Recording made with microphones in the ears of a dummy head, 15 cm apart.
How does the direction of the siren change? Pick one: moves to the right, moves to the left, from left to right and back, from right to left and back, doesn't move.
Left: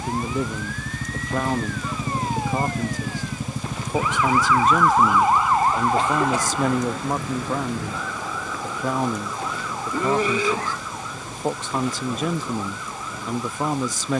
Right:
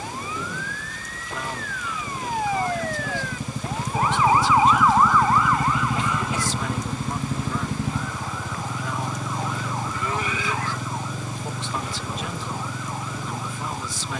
moves to the left.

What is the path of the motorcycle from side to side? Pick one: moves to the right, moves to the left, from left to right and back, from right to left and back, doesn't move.
moves to the right.